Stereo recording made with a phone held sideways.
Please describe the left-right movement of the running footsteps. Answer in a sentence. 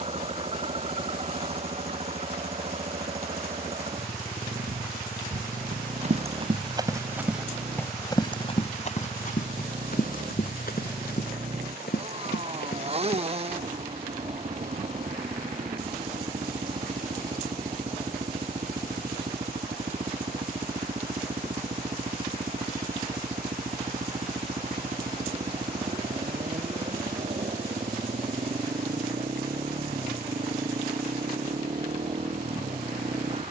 You can hear the running footsteps move to the left.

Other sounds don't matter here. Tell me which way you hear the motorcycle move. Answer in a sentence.
In this clip you hear the motorcycle stay put.